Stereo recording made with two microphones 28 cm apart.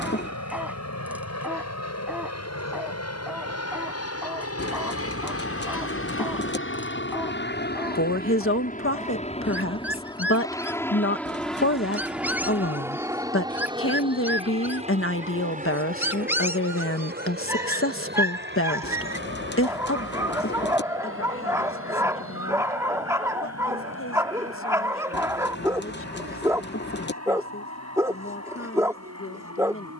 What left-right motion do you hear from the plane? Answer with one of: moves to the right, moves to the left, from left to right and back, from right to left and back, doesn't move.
moves to the right.